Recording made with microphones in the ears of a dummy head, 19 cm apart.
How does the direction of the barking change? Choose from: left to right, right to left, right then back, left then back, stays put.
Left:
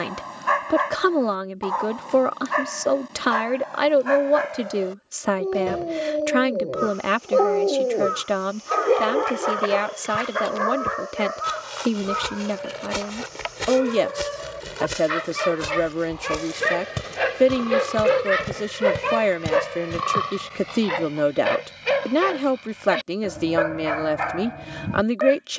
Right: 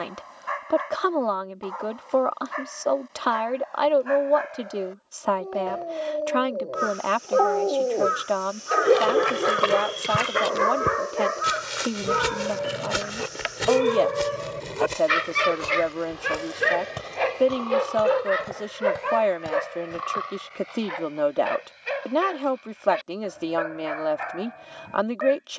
right then back.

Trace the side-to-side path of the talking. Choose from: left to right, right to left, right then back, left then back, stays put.
stays put.